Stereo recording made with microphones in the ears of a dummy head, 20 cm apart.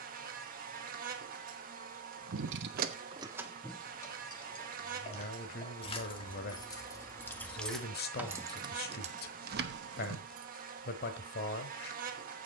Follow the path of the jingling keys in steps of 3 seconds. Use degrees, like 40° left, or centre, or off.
50° right, 10° left, centre, 50° right.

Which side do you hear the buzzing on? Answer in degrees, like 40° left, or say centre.
40° right.